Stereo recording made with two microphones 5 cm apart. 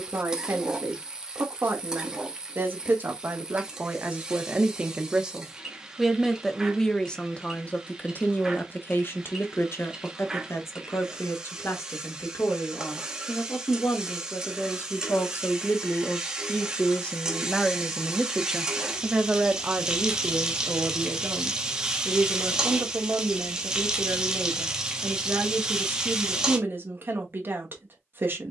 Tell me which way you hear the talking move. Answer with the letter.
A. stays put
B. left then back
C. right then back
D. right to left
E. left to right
B.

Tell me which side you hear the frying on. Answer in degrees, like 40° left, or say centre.
10° right.